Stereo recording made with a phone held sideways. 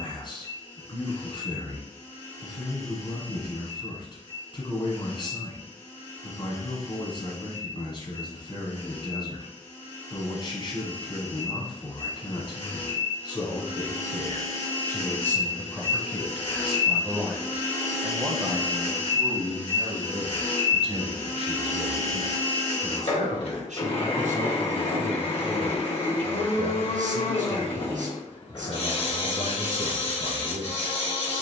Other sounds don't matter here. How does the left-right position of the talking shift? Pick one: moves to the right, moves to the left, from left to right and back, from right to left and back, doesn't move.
moves to the right.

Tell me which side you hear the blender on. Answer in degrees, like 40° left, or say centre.
50° left.